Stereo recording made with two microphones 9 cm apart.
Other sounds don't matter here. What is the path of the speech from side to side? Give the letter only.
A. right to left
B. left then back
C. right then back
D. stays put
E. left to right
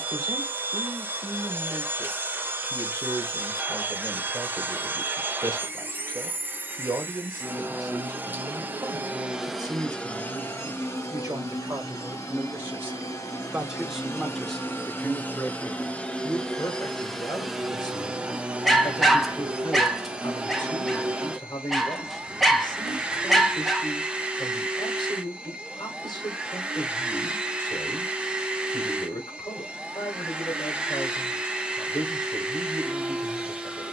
A.